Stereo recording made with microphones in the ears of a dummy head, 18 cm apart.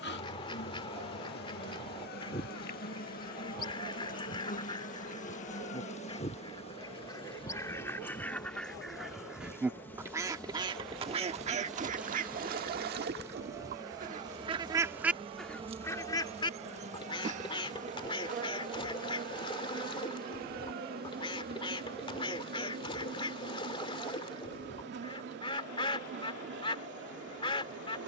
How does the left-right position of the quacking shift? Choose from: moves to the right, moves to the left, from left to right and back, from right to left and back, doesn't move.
from left to right and back.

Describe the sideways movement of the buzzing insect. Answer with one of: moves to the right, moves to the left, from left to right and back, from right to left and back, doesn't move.
moves to the right.